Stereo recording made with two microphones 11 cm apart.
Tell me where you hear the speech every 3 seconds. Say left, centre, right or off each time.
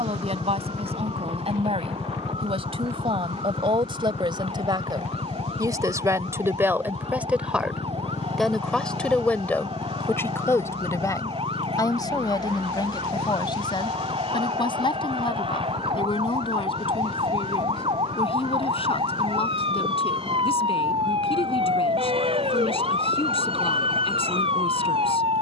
right, right, centre, left, left, left, left, left, left.